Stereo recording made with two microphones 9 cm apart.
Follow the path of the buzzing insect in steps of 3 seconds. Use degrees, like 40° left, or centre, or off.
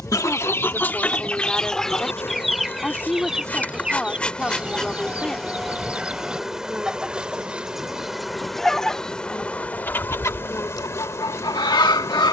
30° left, 10° left, centre, 20° left.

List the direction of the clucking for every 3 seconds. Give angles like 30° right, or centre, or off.
10° left, 10° right, centre, 40° left.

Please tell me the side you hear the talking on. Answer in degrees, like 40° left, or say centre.
10° left.